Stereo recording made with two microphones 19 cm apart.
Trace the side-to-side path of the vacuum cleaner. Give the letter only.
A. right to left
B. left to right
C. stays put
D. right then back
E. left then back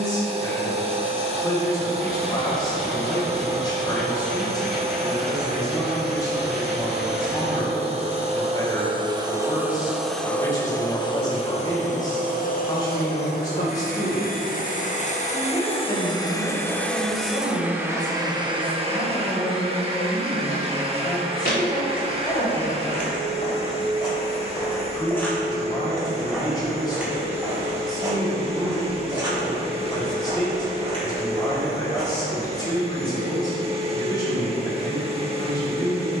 E.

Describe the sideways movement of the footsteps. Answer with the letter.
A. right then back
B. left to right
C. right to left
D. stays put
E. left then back
B.